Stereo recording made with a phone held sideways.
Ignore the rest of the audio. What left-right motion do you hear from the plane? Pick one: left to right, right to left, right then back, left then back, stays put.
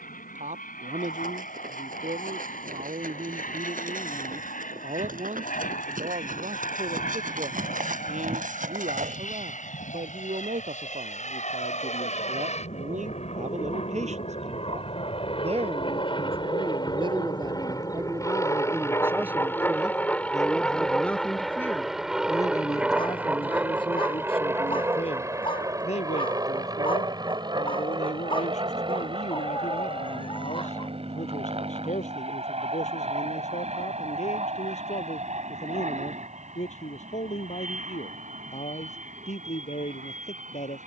left to right.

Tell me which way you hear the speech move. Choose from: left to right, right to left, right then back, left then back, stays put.
right to left.